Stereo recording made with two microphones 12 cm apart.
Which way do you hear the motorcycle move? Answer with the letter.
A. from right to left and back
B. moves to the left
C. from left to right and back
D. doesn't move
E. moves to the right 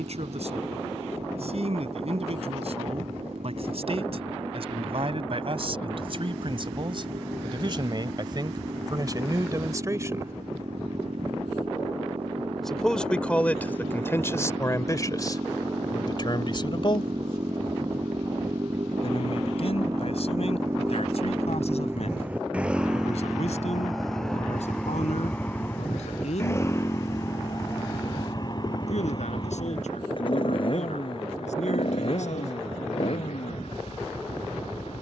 B.